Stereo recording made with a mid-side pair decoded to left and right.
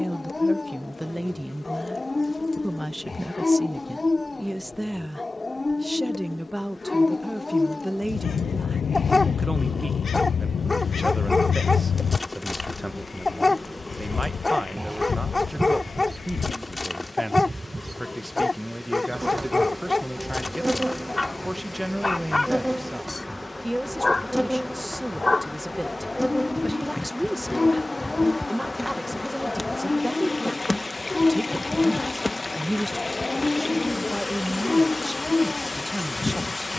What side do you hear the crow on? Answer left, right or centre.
left.